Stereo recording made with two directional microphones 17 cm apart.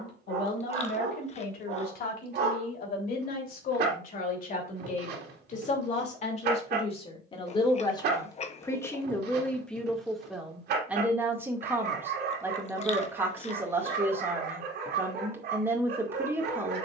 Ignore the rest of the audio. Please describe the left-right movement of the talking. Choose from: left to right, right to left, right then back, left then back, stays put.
left to right.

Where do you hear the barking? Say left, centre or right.
right.